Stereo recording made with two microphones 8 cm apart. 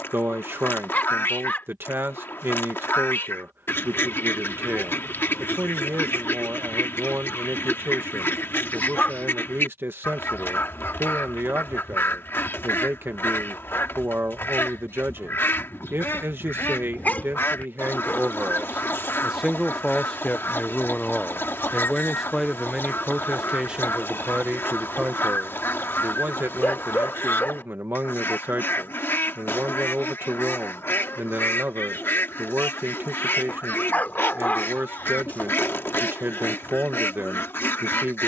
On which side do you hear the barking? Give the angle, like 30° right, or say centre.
20° left.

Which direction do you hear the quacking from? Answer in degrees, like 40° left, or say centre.
30° left.